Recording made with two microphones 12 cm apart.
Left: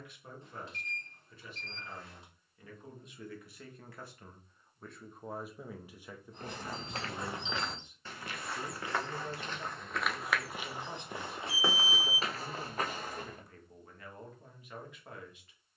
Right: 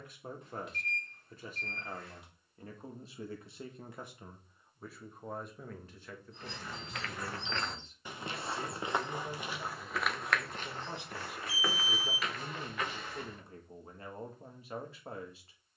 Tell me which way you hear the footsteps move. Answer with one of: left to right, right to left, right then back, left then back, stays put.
right then back.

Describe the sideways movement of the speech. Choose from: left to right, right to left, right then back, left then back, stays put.
left then back.